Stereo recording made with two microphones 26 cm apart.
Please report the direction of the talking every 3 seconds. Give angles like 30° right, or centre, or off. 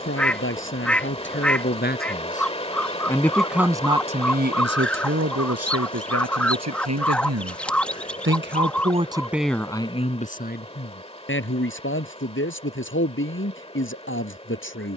40° left, 40° right, 60° right, 30° left, 50° left.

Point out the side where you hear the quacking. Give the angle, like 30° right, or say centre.
centre.